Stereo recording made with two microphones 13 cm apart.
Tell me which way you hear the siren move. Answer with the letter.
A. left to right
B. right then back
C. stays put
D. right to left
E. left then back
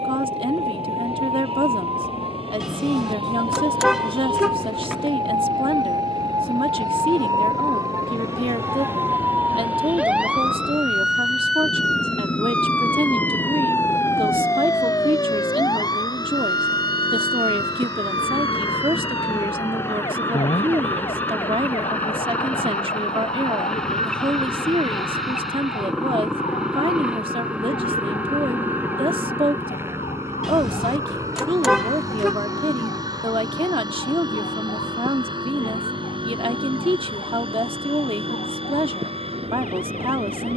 D.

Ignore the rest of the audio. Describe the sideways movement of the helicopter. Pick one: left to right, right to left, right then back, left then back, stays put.
left to right.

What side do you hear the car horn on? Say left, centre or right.
centre.